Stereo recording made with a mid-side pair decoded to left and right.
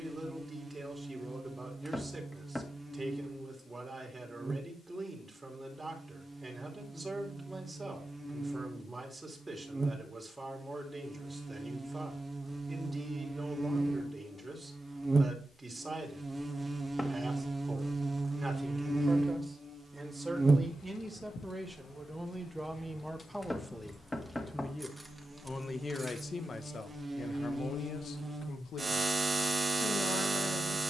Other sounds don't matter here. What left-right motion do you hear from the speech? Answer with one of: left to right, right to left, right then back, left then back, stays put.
right to left.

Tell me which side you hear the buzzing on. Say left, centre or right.
right.